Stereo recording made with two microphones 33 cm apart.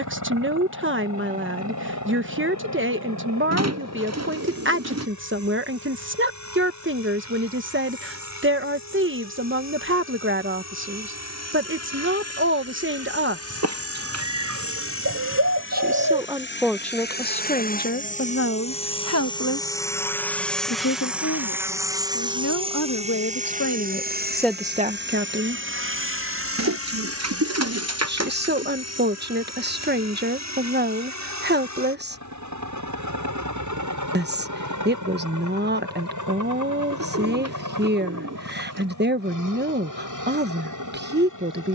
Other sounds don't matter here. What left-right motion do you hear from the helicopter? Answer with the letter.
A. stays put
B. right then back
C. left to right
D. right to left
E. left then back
C.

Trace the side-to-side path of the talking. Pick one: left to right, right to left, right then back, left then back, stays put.
left then back.